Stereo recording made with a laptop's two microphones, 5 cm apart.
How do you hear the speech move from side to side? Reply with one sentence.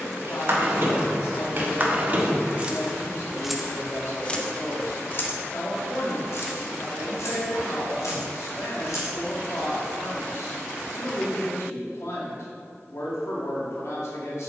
You can hear the speech stay put.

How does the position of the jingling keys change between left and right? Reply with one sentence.
In this clip you hear the jingling keys move from right to left.